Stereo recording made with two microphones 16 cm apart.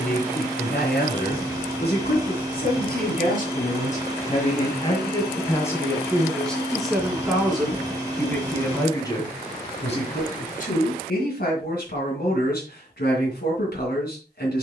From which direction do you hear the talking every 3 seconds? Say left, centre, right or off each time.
left, left, centre, left, left.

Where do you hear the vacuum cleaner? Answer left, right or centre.
right.